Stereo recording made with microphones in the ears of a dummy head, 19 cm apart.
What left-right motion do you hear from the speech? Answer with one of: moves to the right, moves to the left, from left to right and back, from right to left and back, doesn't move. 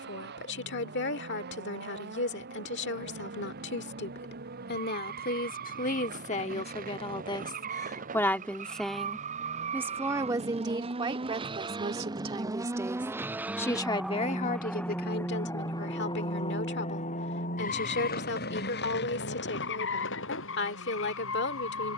from left to right and back.